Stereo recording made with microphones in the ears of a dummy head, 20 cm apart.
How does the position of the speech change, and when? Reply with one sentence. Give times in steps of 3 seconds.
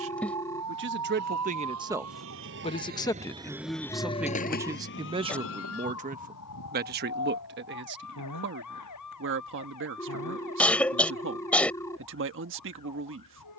In this clip you hear the speech on the right from 0 s, in the centre from 3 s and on the right from 6 s.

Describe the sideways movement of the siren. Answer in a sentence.
In this clip you hear the siren go from the right side to the left.